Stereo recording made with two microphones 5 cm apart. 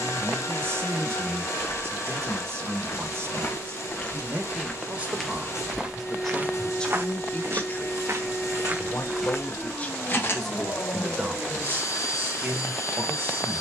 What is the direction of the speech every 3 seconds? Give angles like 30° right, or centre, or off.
50° right, 30° right, 20° left, centre, 50° right.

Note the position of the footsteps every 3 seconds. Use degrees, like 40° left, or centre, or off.
40° left, 10° left, 50° right, 20° left, off.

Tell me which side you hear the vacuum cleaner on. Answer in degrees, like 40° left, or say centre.
60° left.